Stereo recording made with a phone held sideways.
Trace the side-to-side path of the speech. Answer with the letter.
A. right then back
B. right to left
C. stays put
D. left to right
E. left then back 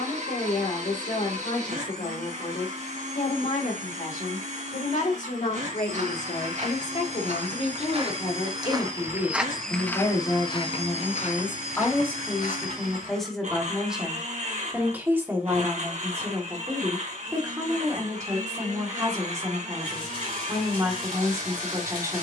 D.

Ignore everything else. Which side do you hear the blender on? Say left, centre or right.
right.